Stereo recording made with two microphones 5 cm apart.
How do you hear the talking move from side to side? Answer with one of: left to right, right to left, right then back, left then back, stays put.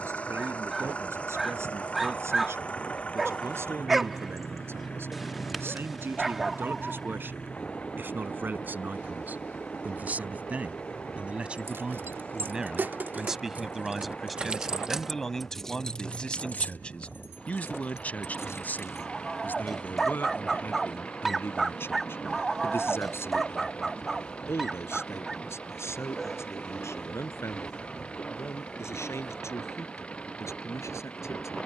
right to left.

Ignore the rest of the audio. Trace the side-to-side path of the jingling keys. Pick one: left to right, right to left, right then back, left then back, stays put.
right to left.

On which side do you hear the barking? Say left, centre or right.
centre.